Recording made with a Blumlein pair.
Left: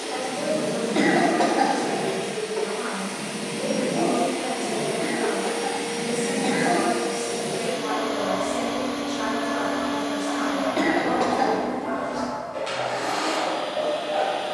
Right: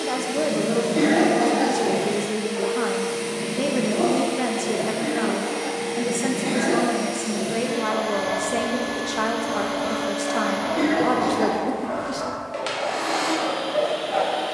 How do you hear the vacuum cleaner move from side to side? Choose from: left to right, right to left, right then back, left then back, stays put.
left then back.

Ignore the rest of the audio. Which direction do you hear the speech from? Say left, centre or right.
right.